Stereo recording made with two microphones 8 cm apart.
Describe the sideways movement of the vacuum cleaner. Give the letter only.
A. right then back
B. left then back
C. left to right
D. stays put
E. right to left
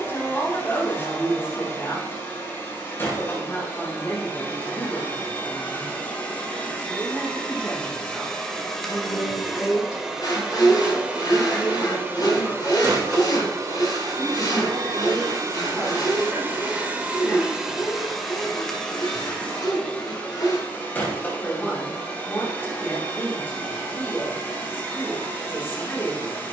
A.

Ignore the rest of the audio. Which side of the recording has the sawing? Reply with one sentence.
You can hear the sawing on the left.